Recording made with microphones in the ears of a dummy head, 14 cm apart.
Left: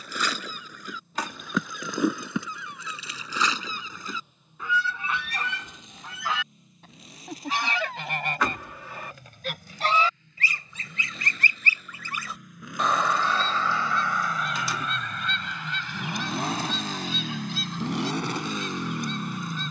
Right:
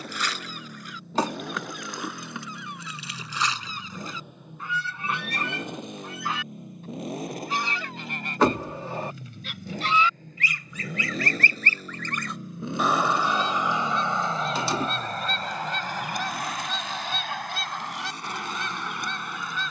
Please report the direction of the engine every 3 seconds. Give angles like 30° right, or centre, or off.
50° right, 50° right, 40° right, 40° right, 20° right, 30° left, 60° left.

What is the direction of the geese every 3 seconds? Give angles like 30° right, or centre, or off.
80° left, 70° left, 60° left, 20° left, 10° right, 40° right, 50° right.